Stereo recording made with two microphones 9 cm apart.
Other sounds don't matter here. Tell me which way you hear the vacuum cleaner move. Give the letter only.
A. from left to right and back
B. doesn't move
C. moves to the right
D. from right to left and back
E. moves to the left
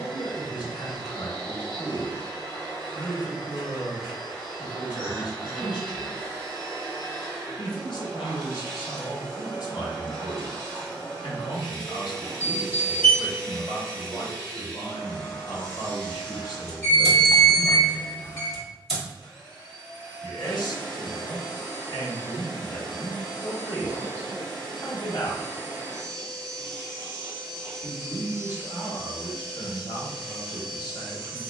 B.